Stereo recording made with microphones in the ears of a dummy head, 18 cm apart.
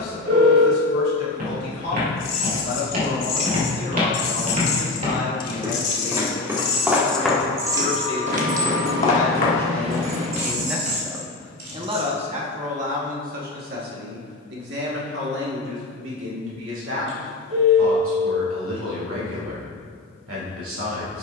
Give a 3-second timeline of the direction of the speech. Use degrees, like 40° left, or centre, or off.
50° left, 50° left, 40° left, centre, 50° right, 70° right, 80° right.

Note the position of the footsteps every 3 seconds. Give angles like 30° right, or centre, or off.
50° right, 40° right, centre, 50° left, off, off, off.